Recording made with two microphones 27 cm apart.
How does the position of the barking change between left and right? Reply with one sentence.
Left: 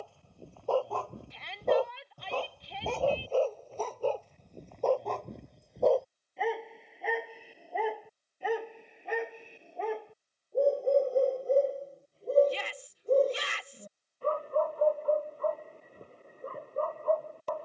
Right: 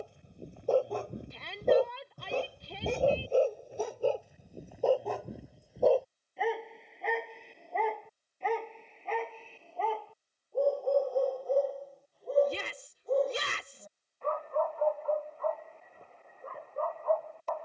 In this clip you hear the barking travel towards the left.